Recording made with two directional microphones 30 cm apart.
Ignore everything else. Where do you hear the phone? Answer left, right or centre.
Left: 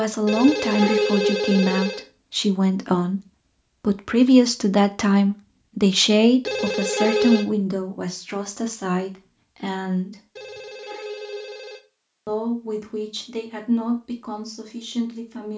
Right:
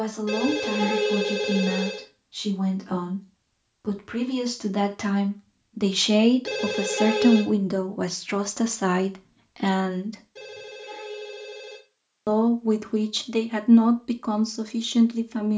left.